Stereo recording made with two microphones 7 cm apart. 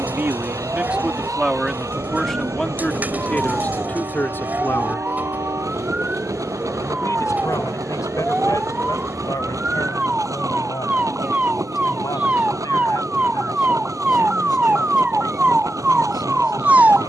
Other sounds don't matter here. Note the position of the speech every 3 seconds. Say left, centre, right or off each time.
centre, left, left, left, left, left.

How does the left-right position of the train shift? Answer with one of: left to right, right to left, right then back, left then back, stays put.
stays put.